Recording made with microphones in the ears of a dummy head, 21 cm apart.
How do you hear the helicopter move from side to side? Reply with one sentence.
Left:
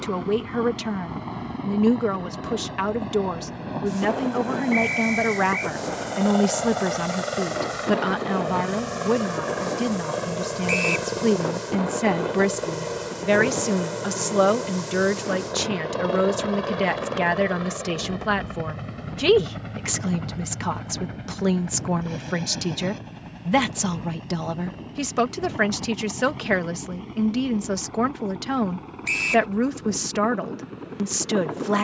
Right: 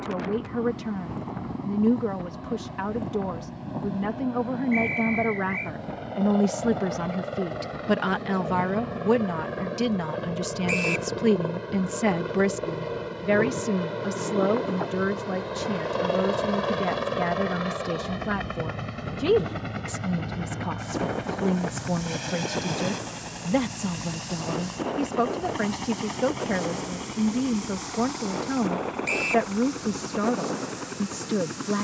You can hear the helicopter travel towards the right.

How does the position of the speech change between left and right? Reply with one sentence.
In this clip you hear the speech move from left to right and back again.